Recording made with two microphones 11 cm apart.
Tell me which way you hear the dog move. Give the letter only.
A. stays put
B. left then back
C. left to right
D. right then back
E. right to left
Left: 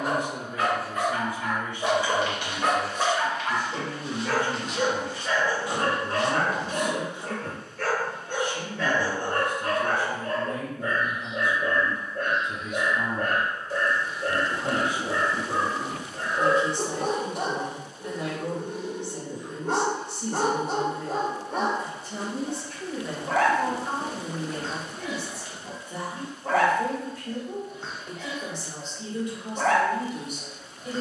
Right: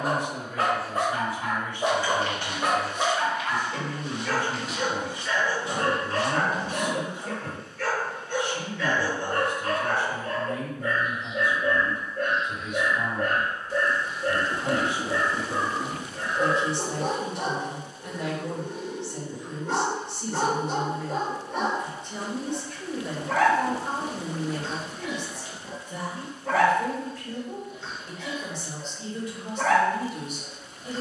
E.